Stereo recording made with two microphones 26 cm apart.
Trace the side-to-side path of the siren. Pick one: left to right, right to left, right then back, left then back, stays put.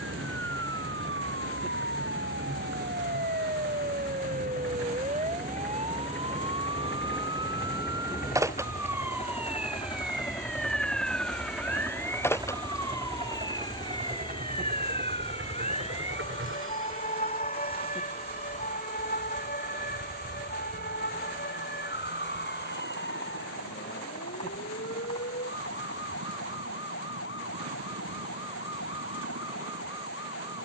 right to left.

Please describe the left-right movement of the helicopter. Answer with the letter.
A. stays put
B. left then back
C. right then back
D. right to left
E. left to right
E.